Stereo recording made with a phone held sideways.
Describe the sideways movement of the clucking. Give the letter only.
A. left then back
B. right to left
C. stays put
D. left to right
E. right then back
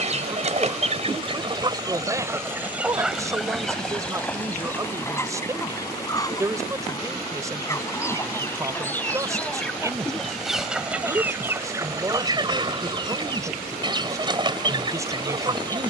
A.